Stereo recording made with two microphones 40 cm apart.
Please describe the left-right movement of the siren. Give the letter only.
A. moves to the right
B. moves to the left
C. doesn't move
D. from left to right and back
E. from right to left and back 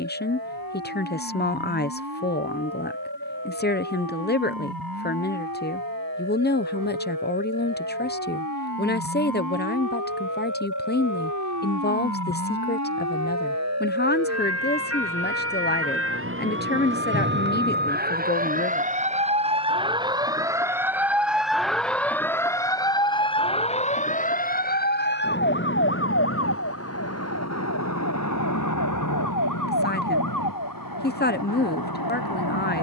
B.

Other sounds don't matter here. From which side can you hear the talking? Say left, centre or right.
left.